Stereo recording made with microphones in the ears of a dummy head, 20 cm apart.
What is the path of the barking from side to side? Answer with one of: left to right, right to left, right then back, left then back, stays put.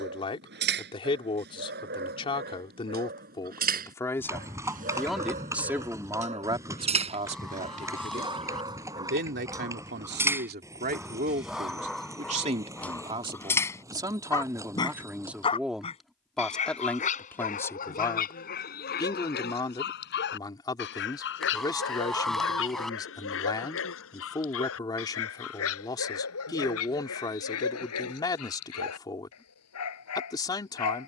right to left.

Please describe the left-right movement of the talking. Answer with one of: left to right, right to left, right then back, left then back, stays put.
right then back.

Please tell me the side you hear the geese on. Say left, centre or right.
centre.